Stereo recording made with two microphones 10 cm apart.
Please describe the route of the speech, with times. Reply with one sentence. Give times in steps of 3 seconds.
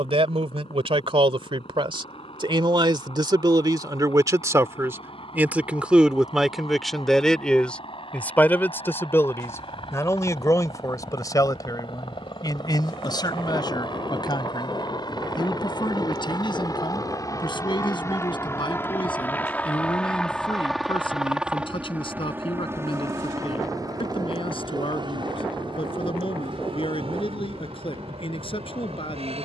You can hear the speech on the right from 0 s, in the centre from 6 s and on the left from 9 s.